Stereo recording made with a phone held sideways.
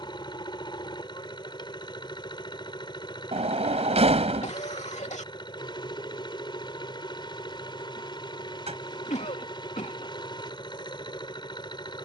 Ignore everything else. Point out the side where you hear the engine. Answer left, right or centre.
left.